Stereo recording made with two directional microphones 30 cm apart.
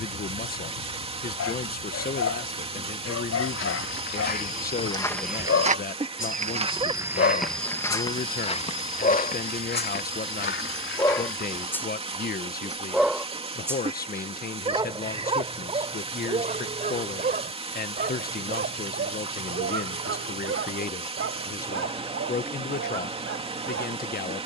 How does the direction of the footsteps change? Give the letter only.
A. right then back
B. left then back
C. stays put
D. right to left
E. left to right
A.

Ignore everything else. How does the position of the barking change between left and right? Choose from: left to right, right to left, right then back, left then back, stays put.
left to right.